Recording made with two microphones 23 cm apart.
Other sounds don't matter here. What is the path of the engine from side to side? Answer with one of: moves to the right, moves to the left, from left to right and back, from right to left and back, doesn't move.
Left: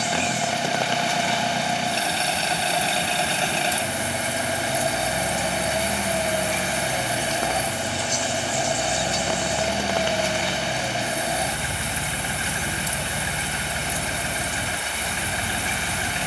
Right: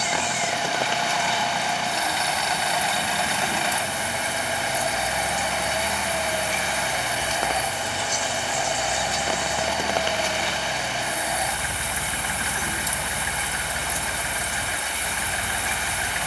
doesn't move.